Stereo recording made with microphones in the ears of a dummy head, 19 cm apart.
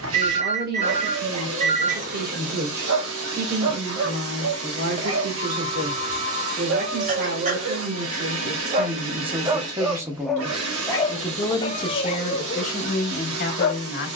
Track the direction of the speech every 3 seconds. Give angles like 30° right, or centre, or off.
40° right, 40° right, 40° right, centre, 40° left.